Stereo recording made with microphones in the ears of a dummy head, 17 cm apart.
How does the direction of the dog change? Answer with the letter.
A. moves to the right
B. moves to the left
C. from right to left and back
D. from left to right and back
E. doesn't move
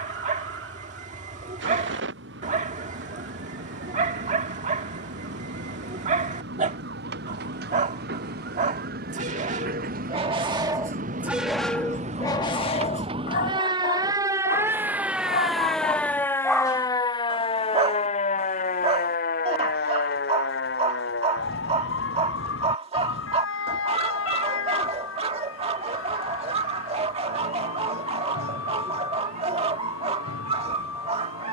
C.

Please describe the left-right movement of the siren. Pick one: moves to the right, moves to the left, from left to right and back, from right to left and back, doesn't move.
moves to the left.